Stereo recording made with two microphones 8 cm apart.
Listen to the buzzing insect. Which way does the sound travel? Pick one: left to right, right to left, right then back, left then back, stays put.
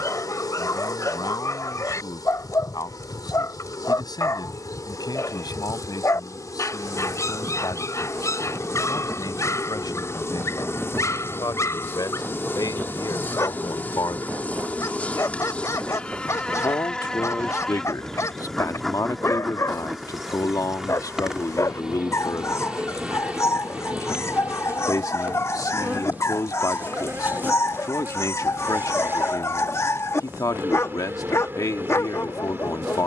left to right.